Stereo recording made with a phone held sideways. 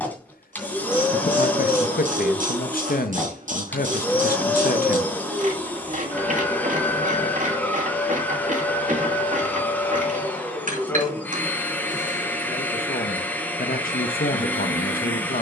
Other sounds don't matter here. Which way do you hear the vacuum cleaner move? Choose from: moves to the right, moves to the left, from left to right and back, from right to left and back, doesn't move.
doesn't move.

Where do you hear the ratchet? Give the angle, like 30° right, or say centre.
60° right.